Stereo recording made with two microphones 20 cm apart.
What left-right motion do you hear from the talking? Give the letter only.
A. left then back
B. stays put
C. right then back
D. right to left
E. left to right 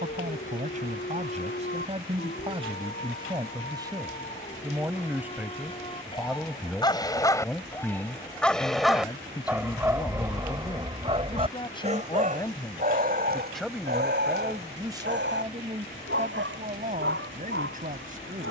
A.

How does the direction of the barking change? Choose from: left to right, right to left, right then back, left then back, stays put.
left to right.